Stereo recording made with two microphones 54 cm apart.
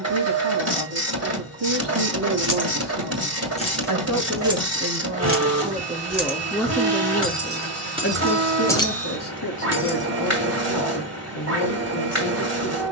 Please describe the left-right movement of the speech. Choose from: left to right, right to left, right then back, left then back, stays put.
right to left.